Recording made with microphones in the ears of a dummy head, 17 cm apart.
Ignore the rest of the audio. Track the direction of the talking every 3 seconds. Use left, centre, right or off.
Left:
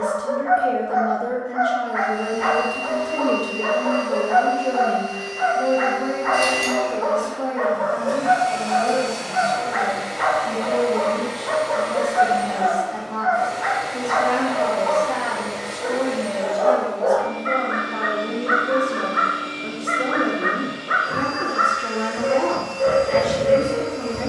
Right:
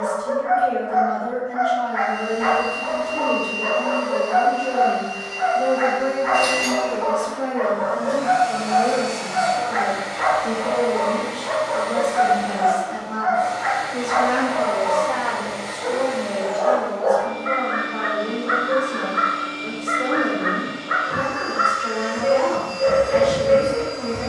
left, left, right, right, right, left, left, left.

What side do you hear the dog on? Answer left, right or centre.
left.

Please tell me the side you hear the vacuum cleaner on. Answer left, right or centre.
left.